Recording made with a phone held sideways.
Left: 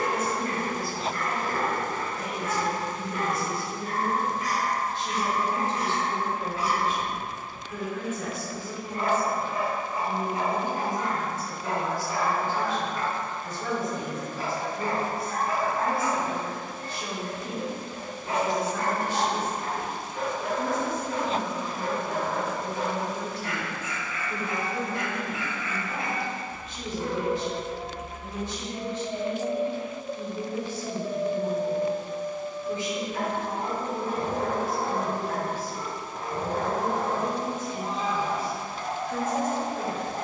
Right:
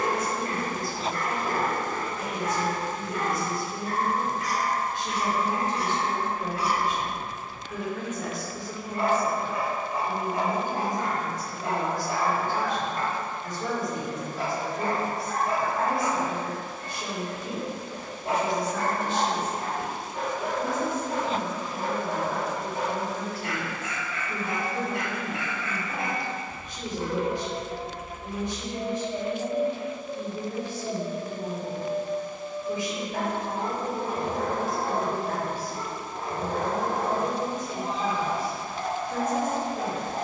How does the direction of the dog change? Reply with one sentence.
In this clip you hear the dog stay put.